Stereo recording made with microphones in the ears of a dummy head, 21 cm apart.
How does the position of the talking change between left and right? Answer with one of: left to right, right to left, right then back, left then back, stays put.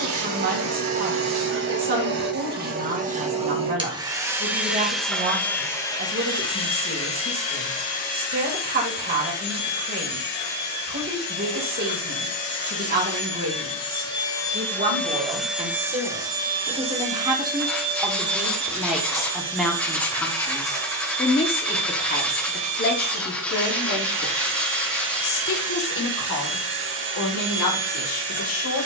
right to left.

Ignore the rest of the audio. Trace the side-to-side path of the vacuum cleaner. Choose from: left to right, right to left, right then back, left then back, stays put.
left then back.